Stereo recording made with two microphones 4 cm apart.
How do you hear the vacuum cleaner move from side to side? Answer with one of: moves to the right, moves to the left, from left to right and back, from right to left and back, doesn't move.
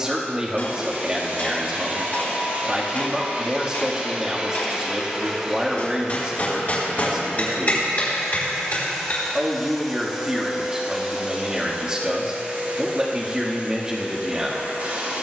from right to left and back.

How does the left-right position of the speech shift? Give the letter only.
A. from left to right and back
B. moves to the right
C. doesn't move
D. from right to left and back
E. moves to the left
C.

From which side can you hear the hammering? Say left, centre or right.
left.